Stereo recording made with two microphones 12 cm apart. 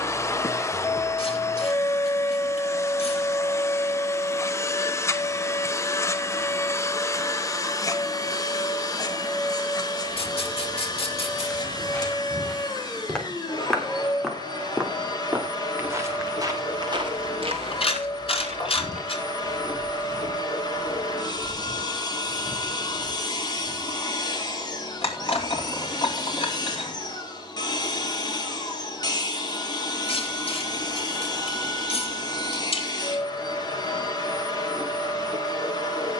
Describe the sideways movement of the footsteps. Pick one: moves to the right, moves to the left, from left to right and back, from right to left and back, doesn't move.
from left to right and back.